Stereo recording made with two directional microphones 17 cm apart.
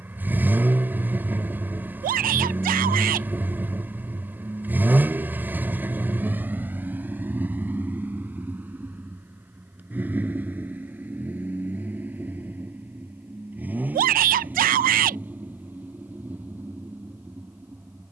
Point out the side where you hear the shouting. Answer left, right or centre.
right.